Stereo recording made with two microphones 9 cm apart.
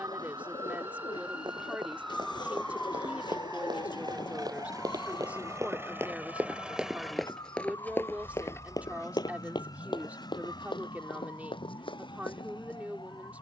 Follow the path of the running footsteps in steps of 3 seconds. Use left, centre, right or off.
right, right, centre, left, left.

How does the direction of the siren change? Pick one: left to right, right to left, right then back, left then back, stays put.
right to left.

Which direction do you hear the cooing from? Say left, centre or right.
left.